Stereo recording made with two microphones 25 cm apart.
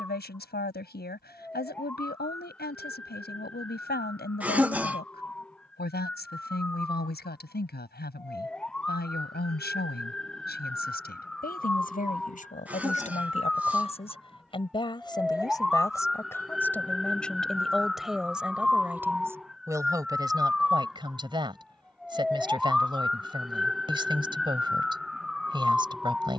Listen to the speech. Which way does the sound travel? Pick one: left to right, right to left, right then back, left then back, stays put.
left to right.